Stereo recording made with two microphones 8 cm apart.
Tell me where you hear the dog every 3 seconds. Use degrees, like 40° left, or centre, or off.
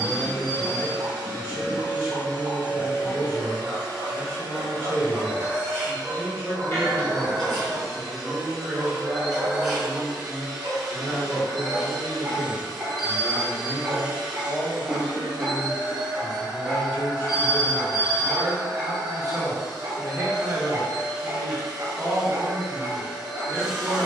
40° right, 40° right, 40° right, 40° right, 30° right, centre, 20° right, 30° right.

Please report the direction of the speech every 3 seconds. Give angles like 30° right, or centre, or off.
40° right, 30° right, 10° right, 10° left, 20° left, 20° right, 30° right, 30° right.